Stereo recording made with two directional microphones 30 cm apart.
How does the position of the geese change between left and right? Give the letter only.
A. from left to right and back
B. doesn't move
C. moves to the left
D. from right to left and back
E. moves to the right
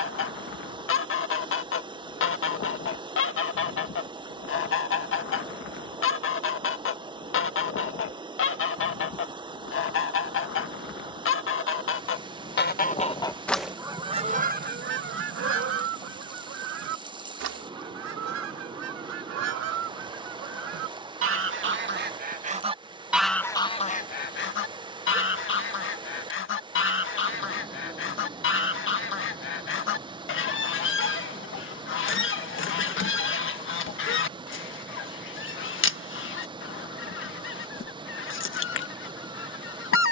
A.